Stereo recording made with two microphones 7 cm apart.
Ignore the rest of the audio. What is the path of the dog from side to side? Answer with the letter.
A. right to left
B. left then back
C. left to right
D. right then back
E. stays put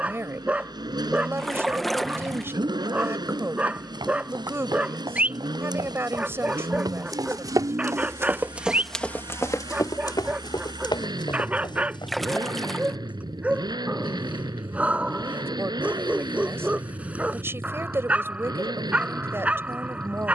E.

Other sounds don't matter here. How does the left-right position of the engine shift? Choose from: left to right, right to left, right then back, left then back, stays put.
stays put.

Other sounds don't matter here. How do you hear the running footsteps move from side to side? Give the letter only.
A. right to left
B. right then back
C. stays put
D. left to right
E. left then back
A.